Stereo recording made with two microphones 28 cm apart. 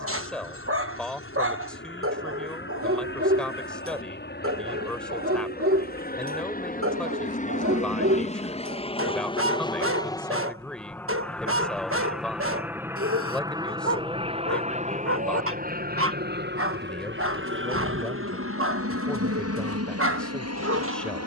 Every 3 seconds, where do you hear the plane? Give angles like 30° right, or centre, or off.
50° left, 40° left, 30° left, 10° left, 10° right, 40° right, 50° right.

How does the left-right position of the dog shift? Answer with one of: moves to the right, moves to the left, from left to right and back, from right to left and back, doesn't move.
doesn't move.